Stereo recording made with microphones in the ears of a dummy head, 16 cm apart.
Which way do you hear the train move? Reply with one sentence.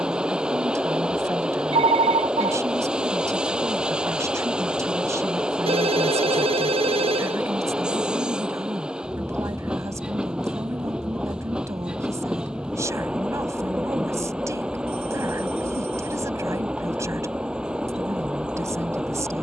You can hear the train stay in one place.